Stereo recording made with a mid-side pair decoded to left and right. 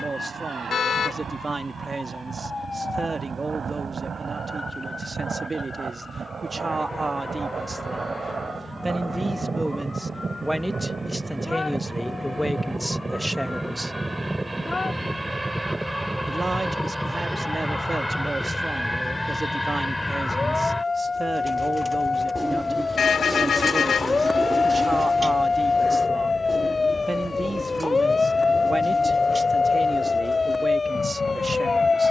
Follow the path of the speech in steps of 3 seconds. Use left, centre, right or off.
right, right, right, centre, centre, right, right, right, right, right, right.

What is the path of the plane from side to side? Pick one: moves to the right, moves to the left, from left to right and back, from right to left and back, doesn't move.
moves to the left.